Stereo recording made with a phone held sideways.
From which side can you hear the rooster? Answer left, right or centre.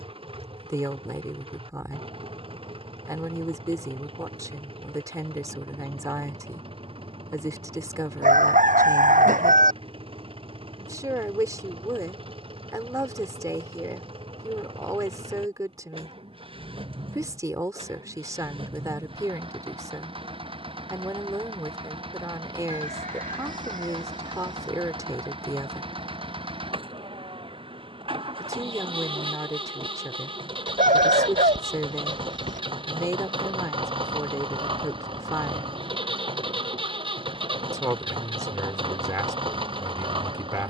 right.